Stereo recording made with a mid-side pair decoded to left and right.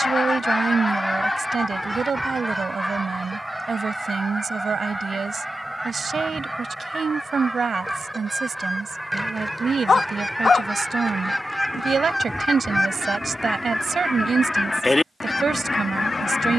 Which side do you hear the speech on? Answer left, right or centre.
right.